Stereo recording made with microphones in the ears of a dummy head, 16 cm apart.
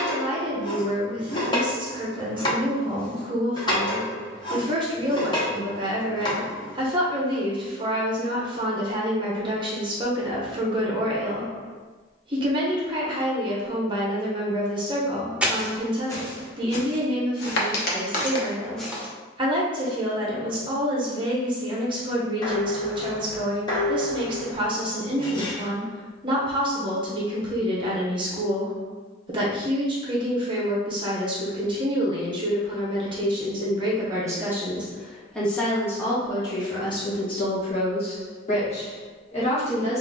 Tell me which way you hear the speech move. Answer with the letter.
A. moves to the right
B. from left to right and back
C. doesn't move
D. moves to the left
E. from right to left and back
D.